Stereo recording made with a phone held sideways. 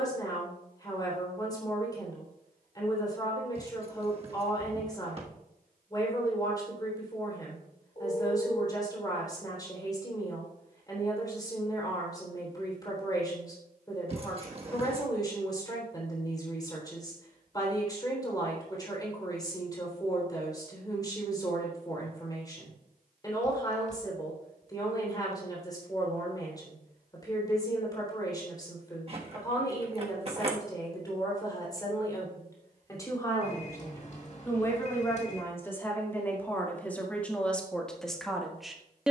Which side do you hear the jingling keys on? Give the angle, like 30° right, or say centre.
40° right.